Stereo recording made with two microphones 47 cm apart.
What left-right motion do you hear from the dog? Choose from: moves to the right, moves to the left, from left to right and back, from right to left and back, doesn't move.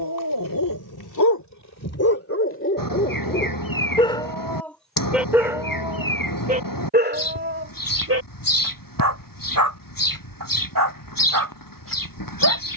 moves to the right.